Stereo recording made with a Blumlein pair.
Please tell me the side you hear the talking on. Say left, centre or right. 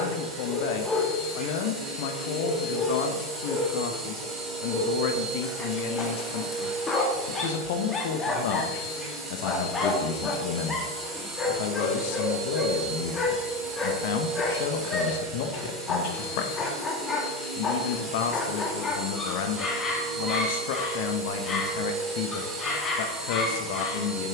left.